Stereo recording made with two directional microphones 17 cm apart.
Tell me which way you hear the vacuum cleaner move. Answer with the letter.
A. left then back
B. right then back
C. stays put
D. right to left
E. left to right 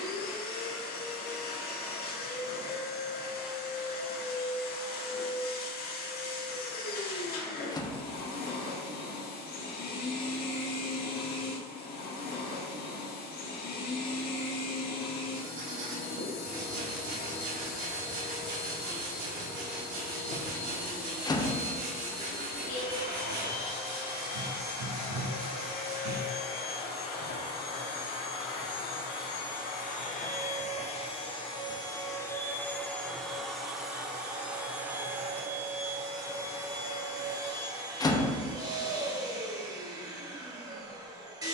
E.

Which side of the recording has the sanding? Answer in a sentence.
You can hear the sanding on the right.